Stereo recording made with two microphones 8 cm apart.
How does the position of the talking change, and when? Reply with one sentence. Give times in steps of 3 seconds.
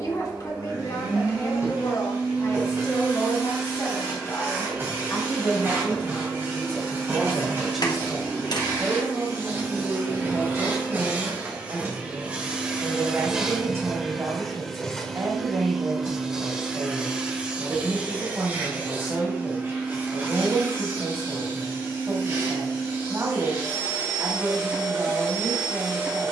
In this clip you hear the talking on the left from 0 s, in the centre from 6 s and on the right from 9 s.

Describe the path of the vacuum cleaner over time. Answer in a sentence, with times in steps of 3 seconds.
In this clip you hear the vacuum cleaner on the right from 0 s, in the centre from 12 s and on the right from 18 s.